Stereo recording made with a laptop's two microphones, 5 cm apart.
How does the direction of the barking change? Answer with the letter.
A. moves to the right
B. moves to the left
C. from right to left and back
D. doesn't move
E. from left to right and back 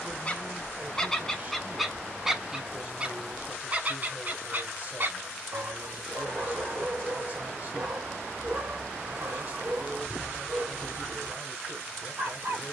A.